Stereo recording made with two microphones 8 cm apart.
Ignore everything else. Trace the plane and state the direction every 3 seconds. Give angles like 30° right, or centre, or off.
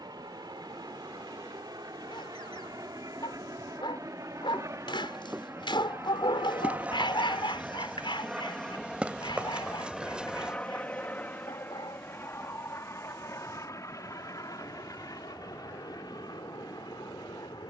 60° right, 40° right, 20° right, 10° left, 40° left, 50° left.